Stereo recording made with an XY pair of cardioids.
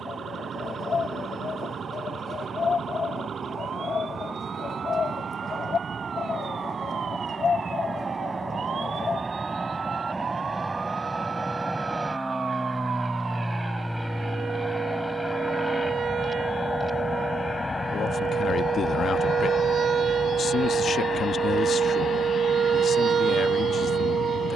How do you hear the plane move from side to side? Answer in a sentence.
You can hear the plane move to the left.